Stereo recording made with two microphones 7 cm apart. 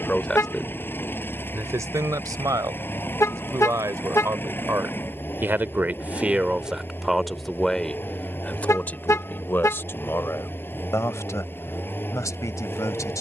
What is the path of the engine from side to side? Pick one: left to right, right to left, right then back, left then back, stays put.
stays put.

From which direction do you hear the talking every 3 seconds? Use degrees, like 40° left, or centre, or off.
30° right, 40° right, centre, 40° left, 50° left.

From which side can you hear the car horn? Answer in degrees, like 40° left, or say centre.
40° left.